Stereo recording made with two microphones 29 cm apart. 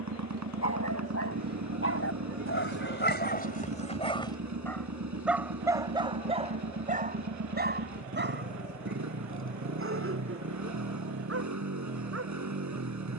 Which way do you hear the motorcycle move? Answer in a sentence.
In this clip you hear the motorcycle stay put.